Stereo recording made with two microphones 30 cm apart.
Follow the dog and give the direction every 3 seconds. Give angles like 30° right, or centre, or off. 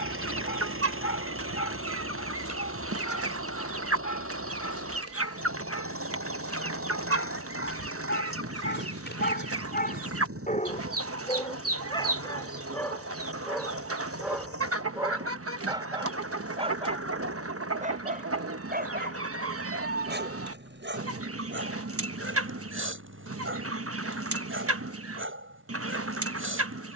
70° left, 60° left, 40° left, 30° left, centre, 20° right, 30° right, 40° right, 40° right.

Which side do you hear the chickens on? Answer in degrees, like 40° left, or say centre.
50° right.